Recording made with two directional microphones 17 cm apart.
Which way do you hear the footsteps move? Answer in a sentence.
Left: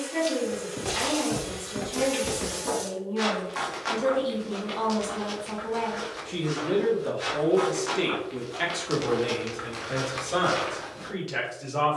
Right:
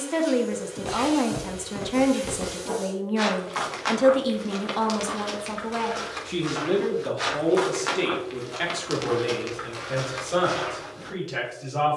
In this clip you hear the footsteps move from left to right and back again.